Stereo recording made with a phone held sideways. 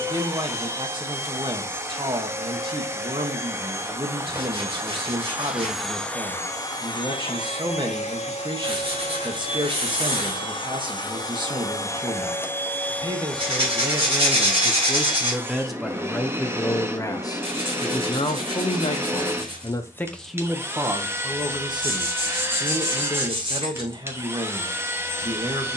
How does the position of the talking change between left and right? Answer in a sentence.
In this clip you hear the talking go left and come back.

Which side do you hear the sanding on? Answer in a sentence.
You can hear the sanding on the right.